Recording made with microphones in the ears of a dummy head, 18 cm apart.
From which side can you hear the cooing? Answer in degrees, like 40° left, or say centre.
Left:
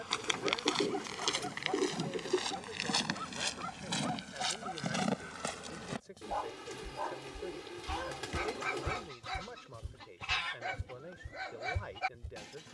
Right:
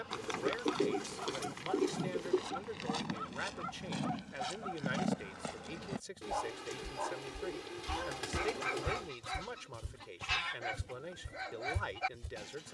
centre.